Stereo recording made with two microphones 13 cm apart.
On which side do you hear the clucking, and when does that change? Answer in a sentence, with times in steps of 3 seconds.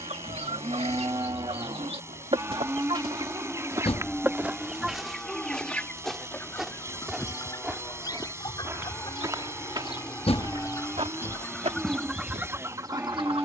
In this clip you hear the clucking on the right from 0 s, in the centre from 3 s, on the left from 6 s and on the right from 12 s.